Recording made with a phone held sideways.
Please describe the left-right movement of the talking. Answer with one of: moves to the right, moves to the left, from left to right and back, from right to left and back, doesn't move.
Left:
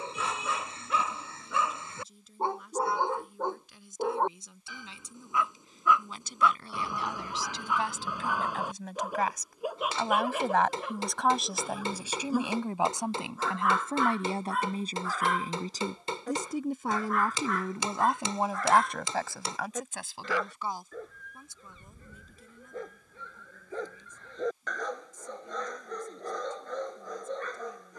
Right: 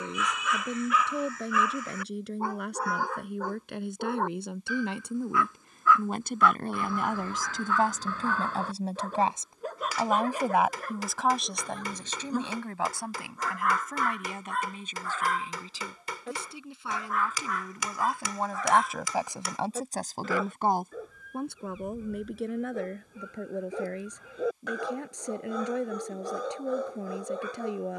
from right to left and back.